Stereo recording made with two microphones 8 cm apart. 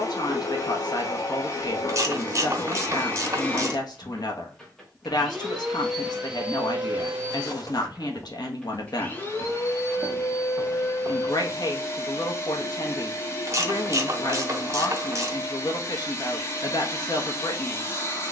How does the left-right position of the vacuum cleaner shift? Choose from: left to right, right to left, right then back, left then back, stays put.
right then back.